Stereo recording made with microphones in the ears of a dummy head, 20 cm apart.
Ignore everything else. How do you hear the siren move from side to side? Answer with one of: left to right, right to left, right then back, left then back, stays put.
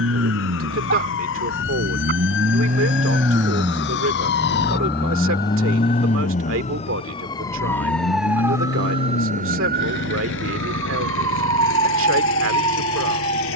left to right.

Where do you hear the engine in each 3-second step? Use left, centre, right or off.
right, centre, left, left, left.